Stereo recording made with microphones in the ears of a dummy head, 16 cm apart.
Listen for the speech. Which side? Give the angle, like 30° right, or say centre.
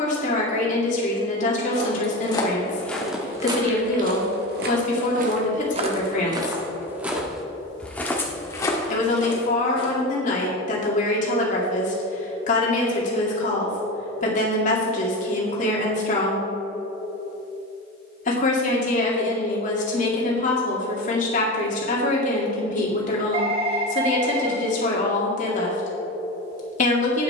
50° left.